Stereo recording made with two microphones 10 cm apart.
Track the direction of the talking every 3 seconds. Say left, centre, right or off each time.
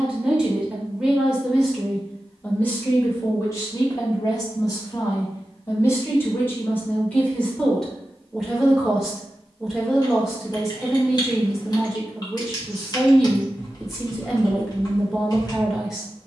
centre, left, centre, centre, centre, centre.